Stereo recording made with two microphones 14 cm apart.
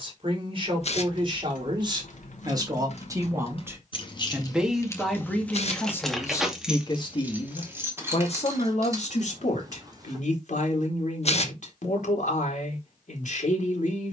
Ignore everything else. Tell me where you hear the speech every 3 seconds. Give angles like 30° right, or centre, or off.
40° right, centre, 40° left, 60° left, 60° left.